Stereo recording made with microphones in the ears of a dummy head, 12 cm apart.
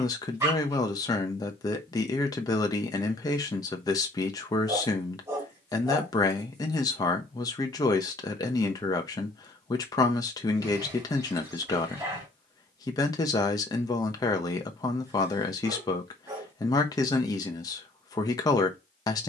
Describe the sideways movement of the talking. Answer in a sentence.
In this clip you hear the talking stay put.